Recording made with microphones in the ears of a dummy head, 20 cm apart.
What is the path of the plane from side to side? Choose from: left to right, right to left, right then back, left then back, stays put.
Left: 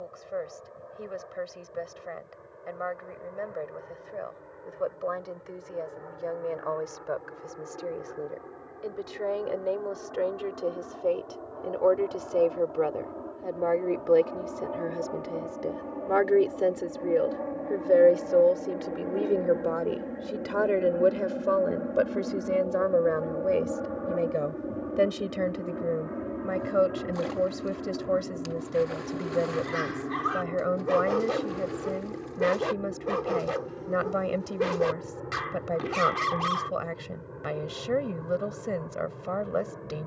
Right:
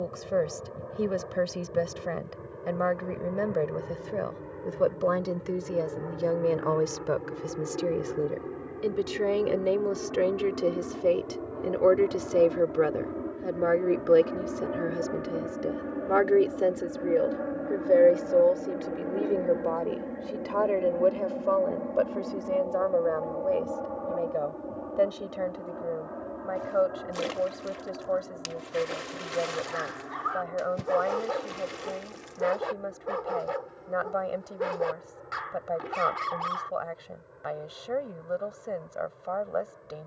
right to left.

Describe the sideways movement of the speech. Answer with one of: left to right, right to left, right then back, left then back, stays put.
right to left.